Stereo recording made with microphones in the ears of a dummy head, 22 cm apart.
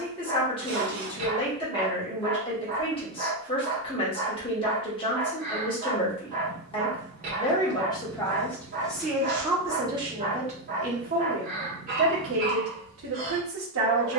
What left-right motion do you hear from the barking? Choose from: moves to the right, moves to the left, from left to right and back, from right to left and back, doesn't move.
doesn't move.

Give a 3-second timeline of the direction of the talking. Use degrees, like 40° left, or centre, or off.
20° left, 20° left, 20° left, 20° right, 60° right.